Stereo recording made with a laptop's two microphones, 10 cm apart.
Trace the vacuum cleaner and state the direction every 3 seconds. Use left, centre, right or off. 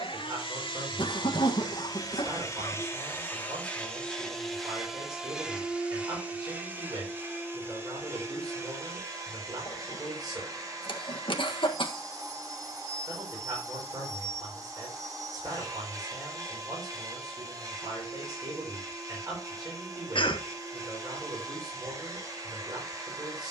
left, centre, right, right, right, right, right, right.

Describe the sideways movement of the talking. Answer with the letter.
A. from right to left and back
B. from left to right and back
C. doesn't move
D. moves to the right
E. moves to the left
C.